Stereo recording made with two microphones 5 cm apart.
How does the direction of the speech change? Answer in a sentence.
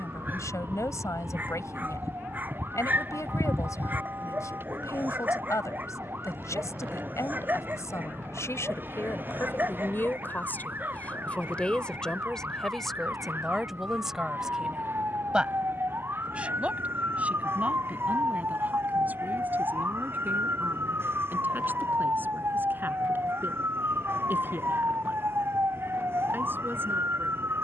You can hear the speech move from left to right.